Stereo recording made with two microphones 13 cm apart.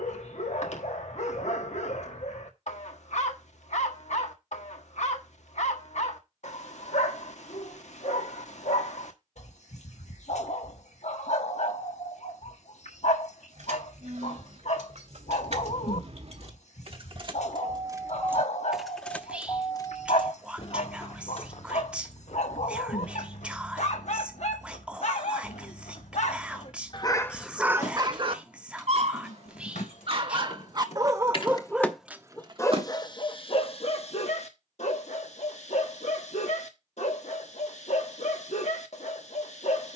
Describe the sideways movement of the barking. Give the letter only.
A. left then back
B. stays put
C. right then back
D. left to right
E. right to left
C.